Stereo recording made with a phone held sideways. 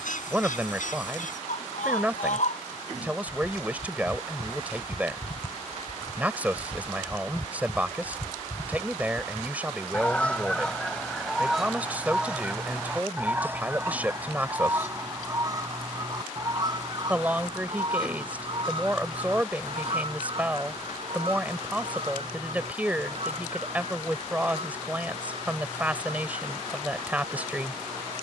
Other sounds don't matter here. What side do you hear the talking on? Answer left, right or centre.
centre.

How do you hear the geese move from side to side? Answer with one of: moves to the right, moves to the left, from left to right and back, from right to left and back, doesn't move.
moves to the right.